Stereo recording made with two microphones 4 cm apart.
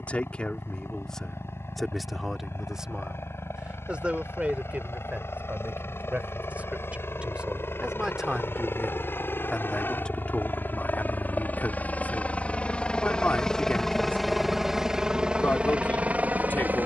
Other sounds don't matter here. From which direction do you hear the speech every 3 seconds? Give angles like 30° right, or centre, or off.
10° left, 30° right, 20° right, 30° left, 40° left, 40° left.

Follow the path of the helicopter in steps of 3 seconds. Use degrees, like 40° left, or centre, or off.
70° left, 70° left, 60° left, 50° left, 10° left, 30° right.